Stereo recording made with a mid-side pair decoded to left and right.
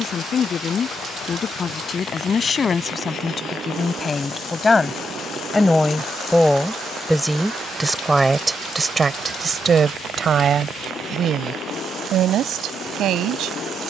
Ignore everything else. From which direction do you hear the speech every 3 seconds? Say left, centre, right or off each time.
left, left, centre, right, right.